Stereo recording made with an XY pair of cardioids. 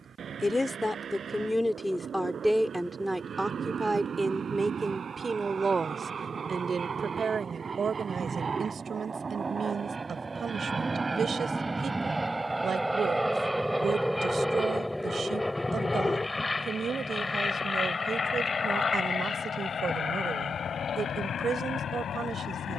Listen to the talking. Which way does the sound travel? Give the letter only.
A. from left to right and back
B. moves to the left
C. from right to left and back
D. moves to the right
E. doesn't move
D.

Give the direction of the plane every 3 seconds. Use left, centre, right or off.
right, right, right, right, centre, left, left, left.